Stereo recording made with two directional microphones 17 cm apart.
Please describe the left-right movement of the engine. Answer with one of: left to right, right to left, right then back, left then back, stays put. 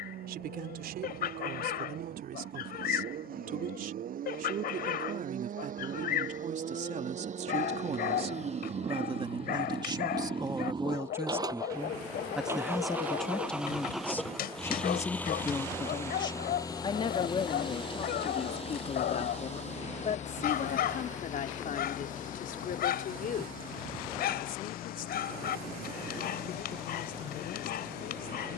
right to left.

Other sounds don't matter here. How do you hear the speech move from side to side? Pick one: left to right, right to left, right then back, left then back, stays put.
right to left.